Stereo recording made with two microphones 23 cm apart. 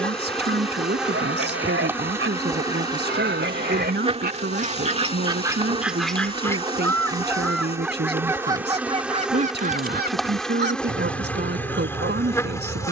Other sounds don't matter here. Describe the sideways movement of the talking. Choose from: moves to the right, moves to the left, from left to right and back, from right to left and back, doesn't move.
doesn't move.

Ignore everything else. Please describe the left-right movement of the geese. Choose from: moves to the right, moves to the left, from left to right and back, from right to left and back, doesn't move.
from right to left and back.